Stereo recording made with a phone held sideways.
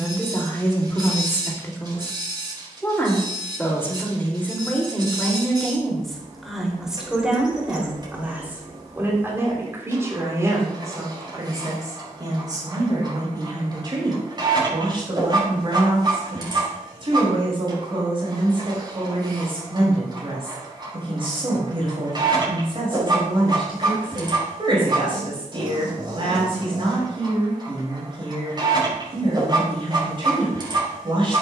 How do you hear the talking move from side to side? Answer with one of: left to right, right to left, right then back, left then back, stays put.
left to right.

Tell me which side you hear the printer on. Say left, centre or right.
right.